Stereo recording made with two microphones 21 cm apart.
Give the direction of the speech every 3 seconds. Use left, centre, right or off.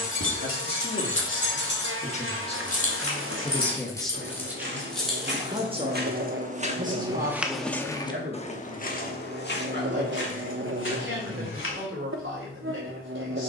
left, centre, right, right, right.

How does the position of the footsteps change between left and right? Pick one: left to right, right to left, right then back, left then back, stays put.
right to left.